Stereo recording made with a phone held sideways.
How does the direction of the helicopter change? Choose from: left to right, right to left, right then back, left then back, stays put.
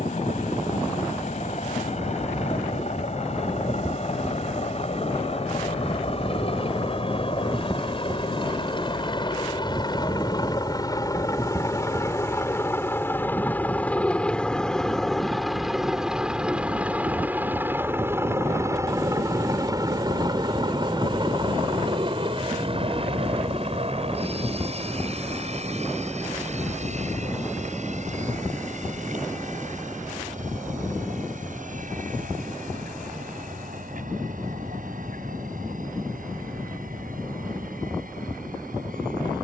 left to right.